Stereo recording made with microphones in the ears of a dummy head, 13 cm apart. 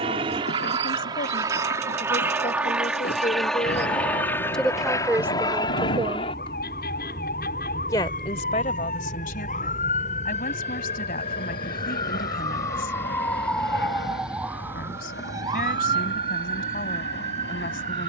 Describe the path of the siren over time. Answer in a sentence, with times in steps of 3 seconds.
You can hear the siren on the left from 0 s, in the centre from 12 s and on the right from 15 s.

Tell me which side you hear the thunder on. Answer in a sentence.
You can hear the thunder on the left.